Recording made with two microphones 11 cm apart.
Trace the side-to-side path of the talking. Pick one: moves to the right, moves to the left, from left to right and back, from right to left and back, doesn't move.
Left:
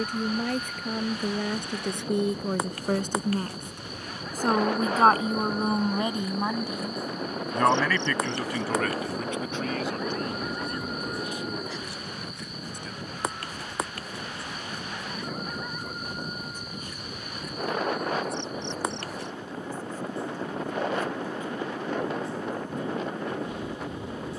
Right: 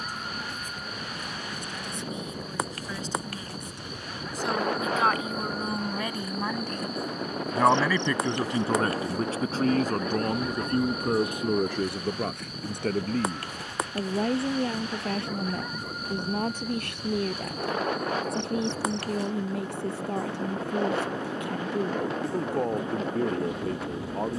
moves to the right.